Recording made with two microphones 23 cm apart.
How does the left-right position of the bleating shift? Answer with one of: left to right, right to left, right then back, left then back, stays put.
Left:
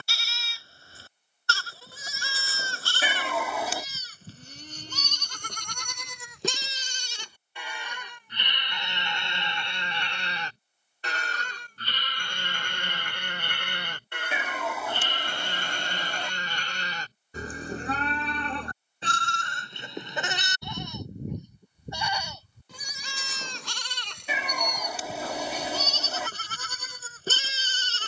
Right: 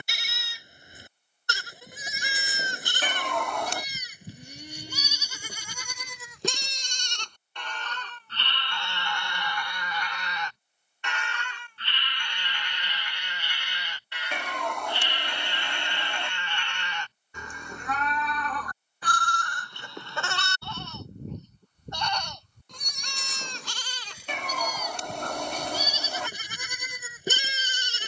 left then back.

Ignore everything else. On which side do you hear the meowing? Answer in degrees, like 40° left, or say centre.
centre.